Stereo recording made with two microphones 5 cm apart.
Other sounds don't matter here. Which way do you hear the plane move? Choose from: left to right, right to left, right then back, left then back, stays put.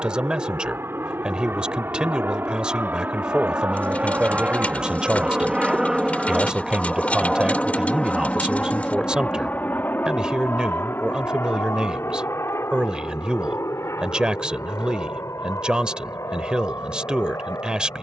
right to left.